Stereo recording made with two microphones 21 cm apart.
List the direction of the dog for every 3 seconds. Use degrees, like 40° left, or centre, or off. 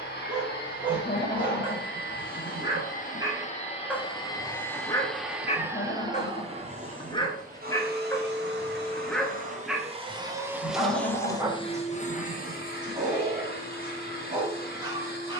20° right, 10° left, 20° left, centre, 20° right.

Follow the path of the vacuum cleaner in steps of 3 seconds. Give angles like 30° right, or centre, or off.
50° left, 10° left, 40° right, 10° right, 50° left.